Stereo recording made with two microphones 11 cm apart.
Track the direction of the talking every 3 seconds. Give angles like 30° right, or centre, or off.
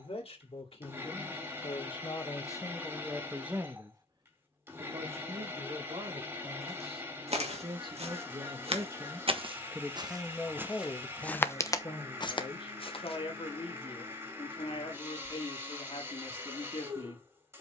50° left, 40° right, 50° right, 20° left, 50° left, 60° left.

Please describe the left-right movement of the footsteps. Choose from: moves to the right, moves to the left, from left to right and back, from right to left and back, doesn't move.
moves to the left.